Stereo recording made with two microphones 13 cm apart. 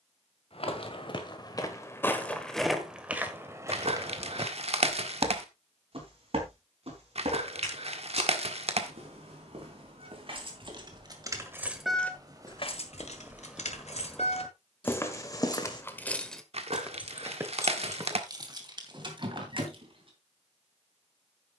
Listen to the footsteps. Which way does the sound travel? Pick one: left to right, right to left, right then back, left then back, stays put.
right then back.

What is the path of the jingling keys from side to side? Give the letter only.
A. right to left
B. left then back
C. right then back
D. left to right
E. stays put
B.